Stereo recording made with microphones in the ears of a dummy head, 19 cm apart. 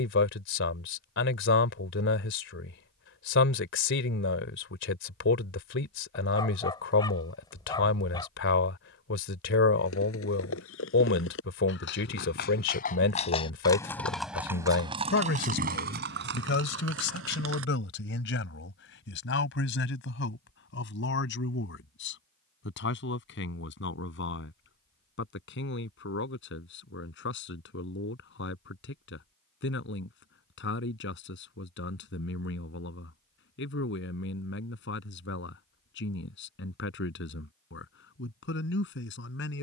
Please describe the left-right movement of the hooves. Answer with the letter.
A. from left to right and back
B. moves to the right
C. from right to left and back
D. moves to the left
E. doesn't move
B.